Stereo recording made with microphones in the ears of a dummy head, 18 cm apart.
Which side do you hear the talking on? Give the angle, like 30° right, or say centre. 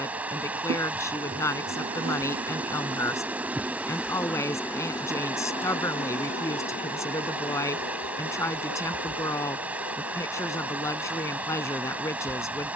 20° left.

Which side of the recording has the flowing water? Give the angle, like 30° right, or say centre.
10° right.